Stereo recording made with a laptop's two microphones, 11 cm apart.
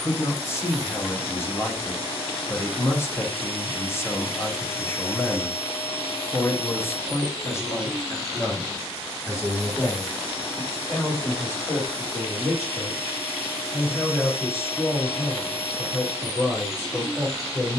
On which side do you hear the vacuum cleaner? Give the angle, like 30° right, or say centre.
70° left.